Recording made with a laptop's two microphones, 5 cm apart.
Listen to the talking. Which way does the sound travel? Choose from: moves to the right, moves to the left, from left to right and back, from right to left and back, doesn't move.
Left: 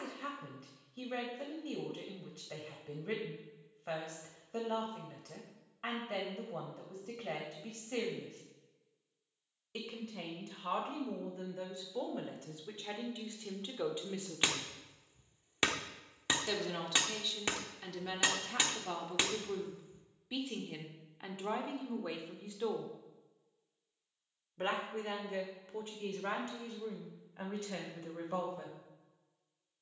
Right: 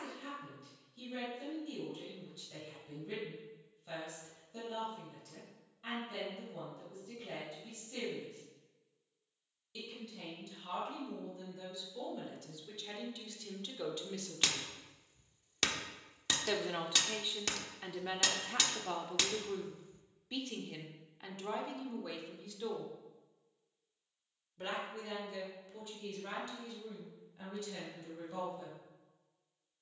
from left to right and back.